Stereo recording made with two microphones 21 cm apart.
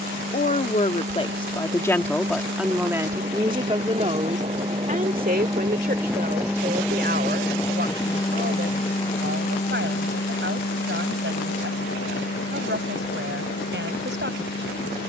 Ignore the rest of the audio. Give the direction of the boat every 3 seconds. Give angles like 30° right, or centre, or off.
50° right, 30° right, 10° left, 50° left, 70° left.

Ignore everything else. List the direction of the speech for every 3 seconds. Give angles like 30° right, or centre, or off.
20° left, 30° right, 60° right, 60° right, 60° right.